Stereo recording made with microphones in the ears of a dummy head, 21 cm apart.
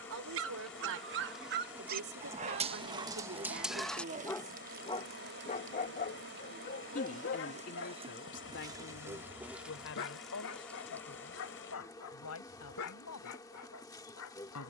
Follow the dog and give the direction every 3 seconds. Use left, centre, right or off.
right, centre, left, left, left.